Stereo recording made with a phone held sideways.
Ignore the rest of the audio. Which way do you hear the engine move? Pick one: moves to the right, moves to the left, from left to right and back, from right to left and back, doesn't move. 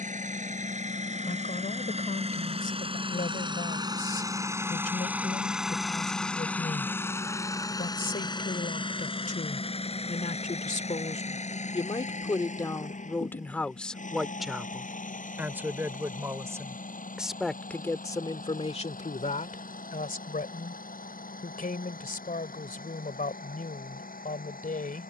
moves to the left.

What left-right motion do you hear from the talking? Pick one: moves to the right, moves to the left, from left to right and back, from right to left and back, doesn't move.
from left to right and back.